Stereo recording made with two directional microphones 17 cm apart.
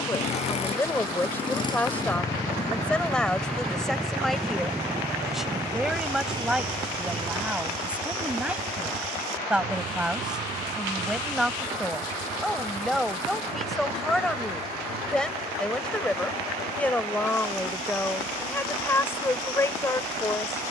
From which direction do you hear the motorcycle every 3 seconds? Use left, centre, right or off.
left, centre, right, right, right, right, right.